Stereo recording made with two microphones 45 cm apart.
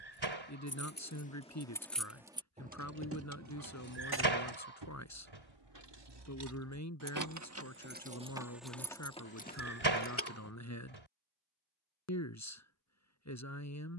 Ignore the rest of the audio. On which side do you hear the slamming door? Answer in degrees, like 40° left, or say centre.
80° right.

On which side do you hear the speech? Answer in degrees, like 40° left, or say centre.
40° left.